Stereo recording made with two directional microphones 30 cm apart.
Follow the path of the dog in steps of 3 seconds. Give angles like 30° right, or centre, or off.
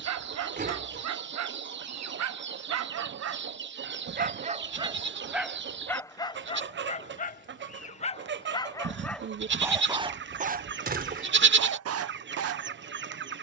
60° right, 20° right, 20° left, 20° right, 50° right.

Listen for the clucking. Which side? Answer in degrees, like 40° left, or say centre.
40° right.